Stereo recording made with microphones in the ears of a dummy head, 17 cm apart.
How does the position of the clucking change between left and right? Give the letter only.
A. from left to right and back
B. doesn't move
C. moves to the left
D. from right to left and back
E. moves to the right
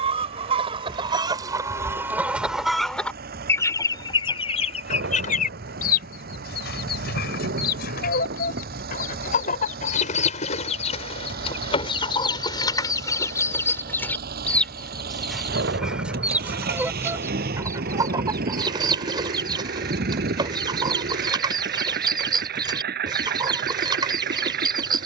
D.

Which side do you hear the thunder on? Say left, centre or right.
right.